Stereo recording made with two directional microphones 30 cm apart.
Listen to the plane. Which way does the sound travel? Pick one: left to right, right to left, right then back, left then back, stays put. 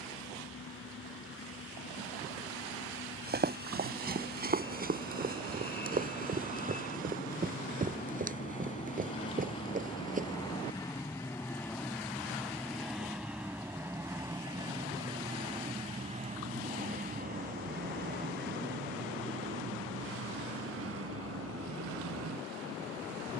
left to right.